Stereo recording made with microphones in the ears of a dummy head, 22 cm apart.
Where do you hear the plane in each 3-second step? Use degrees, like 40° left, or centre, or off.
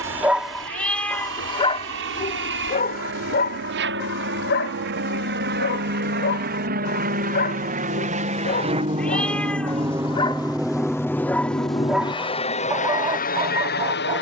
60° right, 50° right, 40° right, centre, 30° left.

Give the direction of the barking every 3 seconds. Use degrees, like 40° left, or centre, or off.
20° left, 50° left, 40° left, 20° left, 20° right.